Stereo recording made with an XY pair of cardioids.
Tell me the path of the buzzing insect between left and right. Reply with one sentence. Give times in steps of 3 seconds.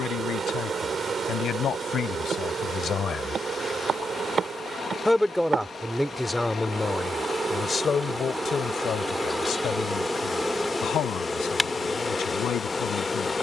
In this clip you hear the buzzing insect on the right from 0 s and in the centre from 9 s.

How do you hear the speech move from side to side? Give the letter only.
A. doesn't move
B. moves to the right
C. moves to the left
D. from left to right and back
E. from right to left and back
D.